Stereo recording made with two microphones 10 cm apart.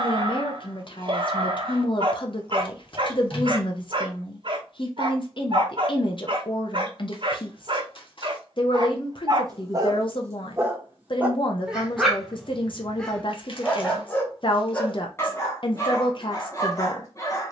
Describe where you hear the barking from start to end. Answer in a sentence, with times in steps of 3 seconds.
In this clip you hear the barking on the right from 0 s, in the centre from 12 s and on the left from 15 s.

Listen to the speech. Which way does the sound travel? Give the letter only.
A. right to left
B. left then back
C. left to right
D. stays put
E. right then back
D.